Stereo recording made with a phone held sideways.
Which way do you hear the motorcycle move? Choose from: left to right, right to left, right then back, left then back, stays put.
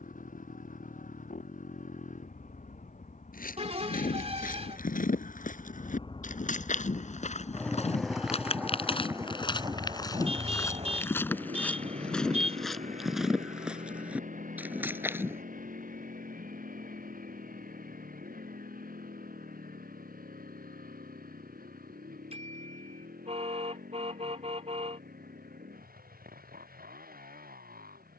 left to right.